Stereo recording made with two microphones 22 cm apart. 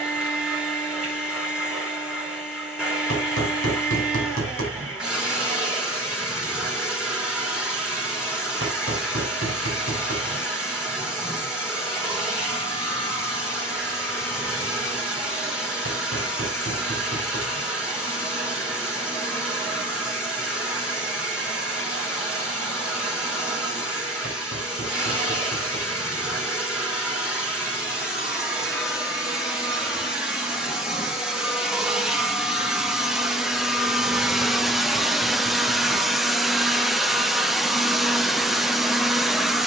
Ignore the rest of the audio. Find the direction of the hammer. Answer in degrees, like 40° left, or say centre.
80° right.